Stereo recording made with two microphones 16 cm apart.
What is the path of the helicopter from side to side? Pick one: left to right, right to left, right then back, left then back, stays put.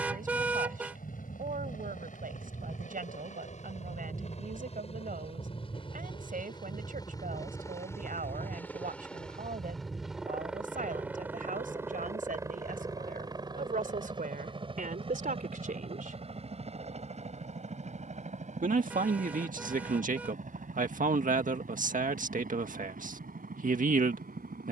left to right.